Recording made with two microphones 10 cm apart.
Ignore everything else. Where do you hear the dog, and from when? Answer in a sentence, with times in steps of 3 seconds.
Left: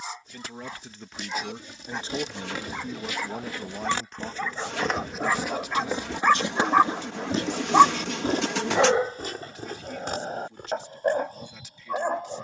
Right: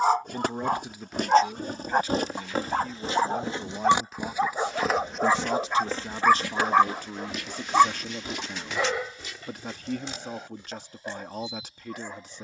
In this clip you hear the dog on the right from 0 s, in the centre from 6 s and on the left from 9 s.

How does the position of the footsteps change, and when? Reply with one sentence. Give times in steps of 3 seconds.
In this clip you hear the footsteps on the right from 0 s, in the centre from 3 s and on the left from 6 s.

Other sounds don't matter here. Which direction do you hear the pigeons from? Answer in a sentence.
You can hear the pigeons on the left.